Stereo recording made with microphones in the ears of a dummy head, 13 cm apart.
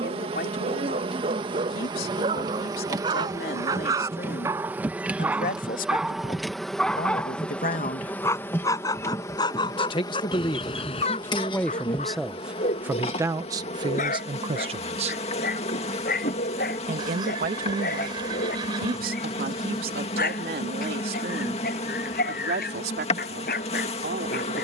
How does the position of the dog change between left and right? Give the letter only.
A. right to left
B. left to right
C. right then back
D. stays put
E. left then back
A.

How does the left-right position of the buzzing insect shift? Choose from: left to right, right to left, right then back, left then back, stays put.
right to left.